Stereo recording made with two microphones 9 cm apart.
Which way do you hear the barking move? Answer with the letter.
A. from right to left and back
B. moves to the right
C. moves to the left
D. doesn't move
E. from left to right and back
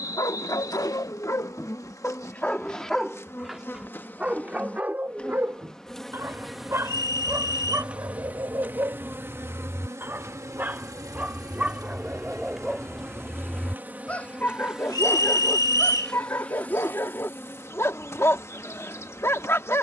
E.